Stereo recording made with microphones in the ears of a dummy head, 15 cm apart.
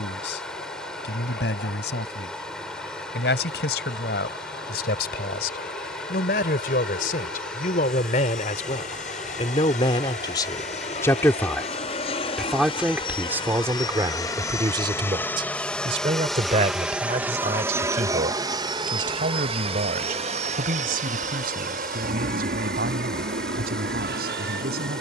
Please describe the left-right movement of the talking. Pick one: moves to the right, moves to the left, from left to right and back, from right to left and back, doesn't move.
moves to the right.